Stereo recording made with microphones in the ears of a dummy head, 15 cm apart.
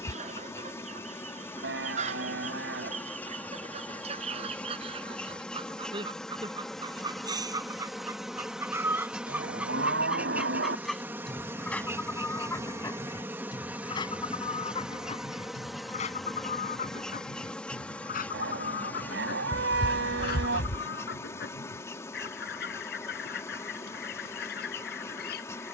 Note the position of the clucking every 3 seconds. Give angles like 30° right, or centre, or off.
40° right, 40° right, 20° right, centre, 20° left, 40° left, 60° left, 60° left, 60° left.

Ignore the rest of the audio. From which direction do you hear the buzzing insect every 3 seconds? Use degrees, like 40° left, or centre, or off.
10° left, 10° left, centre, 10° right, 10° right, centre, 10° left, 20° left, 20° left.